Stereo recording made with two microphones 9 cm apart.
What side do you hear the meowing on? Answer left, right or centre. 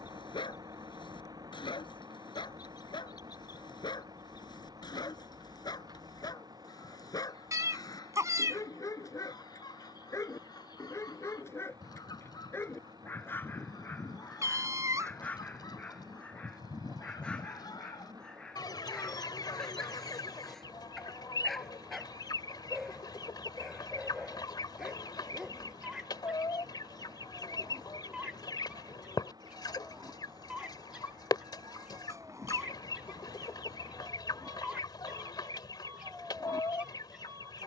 right.